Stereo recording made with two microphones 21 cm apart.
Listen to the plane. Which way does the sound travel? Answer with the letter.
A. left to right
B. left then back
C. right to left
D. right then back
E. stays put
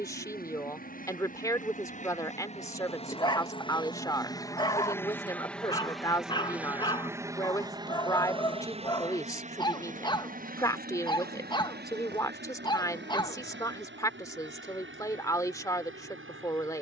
A.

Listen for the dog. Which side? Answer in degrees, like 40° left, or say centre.
20° left.